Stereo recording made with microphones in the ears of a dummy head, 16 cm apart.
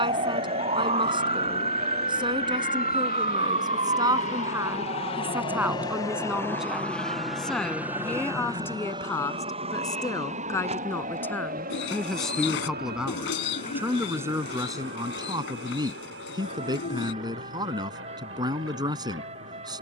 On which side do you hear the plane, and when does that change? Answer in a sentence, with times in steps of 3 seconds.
You can hear the plane on the left from 0 s, in the centre from 6 s and on the right from 9 s.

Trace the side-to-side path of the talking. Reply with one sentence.
In this clip you hear the talking move from right to left and back again.